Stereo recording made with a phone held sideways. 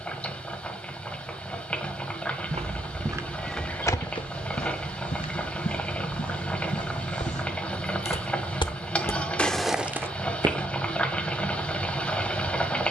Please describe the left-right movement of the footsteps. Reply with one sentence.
You can hear the footsteps go left and come back.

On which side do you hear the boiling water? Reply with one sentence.
You can hear the boiling water in the centre.